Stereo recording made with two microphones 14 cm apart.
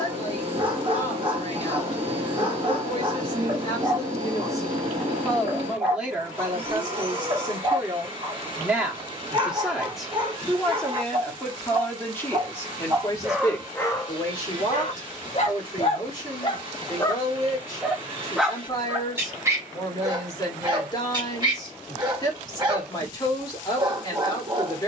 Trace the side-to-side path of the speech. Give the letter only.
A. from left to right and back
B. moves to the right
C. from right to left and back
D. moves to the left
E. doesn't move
A.